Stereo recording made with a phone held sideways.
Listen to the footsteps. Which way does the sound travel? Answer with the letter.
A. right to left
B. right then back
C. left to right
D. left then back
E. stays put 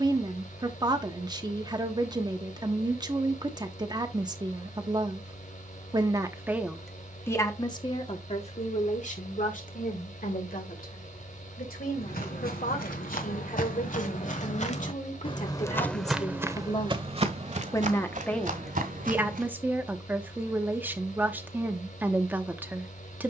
C.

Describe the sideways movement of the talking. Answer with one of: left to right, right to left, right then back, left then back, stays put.
left then back.